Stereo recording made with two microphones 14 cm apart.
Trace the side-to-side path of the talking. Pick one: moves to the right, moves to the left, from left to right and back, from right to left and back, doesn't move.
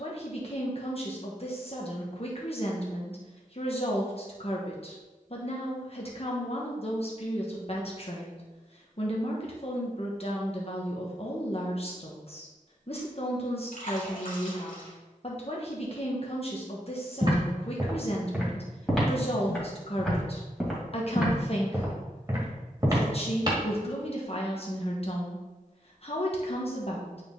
doesn't move.